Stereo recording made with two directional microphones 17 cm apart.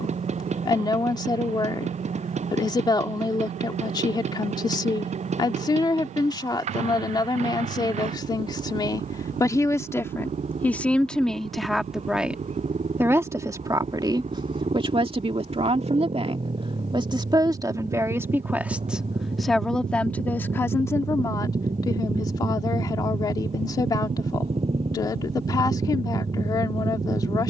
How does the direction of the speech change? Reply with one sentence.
In this clip you hear the speech go right and come back.